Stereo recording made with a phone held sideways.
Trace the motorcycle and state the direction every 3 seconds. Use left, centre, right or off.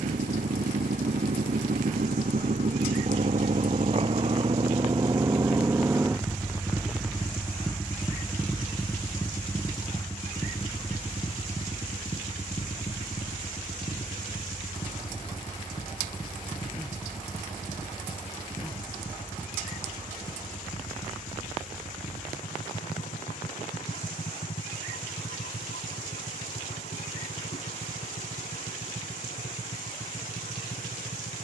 right, right, centre, left, left, left, left, left, left, left, left.